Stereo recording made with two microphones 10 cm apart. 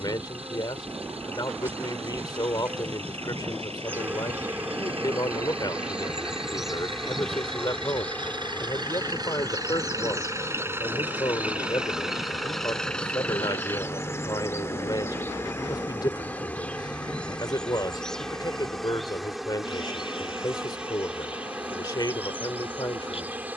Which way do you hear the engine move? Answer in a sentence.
In this clip you hear the engine move from right to left.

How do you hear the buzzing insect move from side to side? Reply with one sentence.
In this clip you hear the buzzing insect go left and come back.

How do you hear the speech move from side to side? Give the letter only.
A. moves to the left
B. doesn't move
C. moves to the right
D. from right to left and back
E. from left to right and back
B.